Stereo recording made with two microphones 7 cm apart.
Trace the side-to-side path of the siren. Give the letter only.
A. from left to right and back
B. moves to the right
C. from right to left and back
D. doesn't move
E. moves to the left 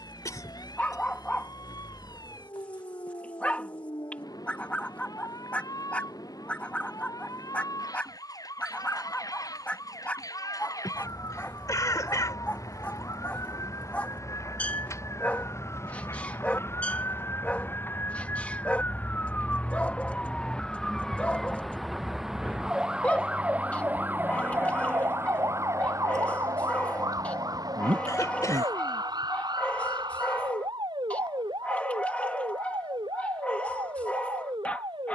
B.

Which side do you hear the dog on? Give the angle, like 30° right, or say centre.
20° left.